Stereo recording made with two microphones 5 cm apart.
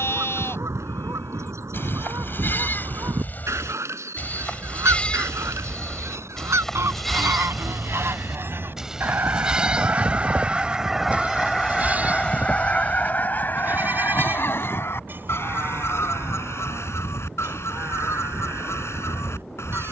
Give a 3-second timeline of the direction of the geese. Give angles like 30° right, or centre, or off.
70° right, 70° right, 60° right, 20° right, 40° left, 60° left, 60° left.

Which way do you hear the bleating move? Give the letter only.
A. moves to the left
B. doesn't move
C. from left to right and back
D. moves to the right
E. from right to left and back
D.